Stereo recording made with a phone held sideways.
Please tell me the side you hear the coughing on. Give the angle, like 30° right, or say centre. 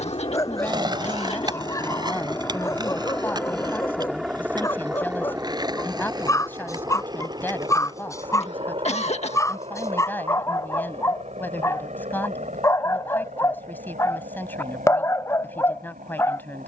50° left.